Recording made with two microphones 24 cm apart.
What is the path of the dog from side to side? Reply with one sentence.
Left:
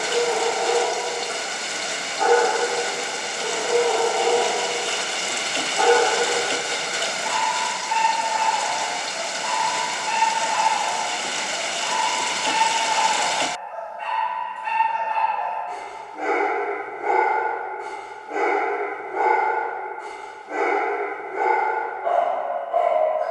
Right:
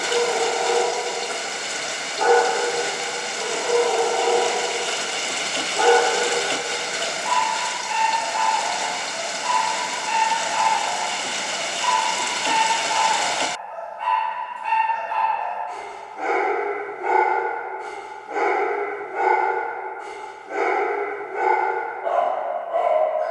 You can hear the dog go left and come back.